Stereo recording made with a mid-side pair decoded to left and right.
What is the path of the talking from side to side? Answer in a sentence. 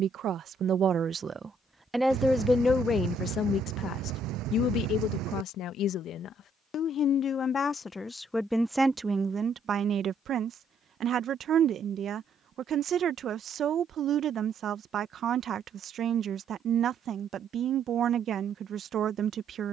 You can hear the talking move from right to left and back again.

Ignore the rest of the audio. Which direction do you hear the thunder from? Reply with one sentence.
You can hear the thunder on the right.